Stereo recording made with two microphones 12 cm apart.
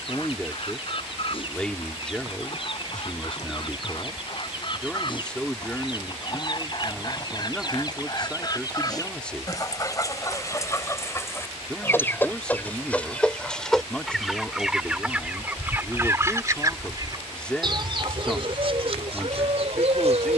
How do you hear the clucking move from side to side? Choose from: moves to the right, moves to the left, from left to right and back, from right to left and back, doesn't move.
moves to the right.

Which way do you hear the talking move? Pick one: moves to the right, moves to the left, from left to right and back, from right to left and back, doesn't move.
doesn't move.